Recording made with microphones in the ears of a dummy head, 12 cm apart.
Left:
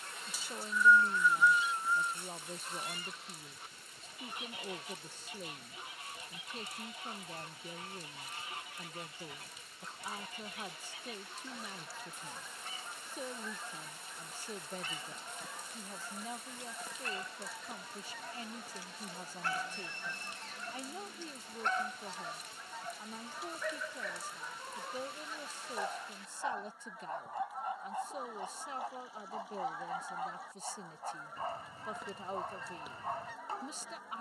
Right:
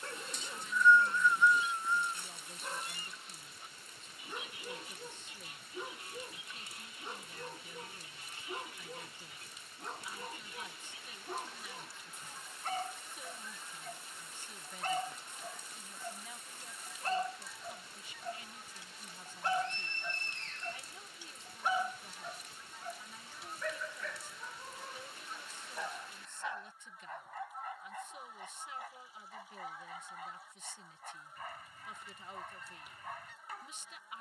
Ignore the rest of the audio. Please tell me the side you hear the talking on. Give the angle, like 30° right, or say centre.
30° left.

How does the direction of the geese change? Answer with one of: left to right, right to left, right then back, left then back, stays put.
stays put.